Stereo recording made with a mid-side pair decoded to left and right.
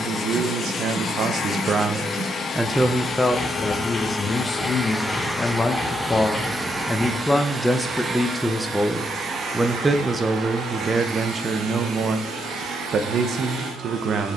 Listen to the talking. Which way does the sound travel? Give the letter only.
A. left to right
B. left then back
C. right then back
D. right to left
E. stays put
B.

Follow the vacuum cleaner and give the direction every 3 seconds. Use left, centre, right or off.
left, centre, right, right, right.